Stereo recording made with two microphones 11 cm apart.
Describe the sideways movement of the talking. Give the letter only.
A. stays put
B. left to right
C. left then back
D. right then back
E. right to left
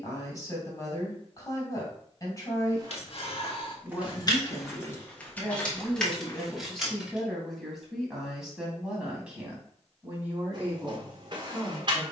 B.